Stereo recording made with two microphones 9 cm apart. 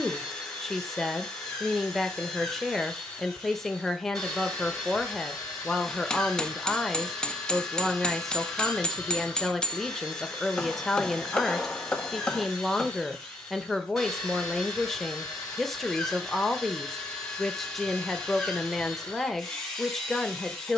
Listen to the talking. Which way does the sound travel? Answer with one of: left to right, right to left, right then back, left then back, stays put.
stays put.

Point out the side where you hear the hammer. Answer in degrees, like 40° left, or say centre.
10° left.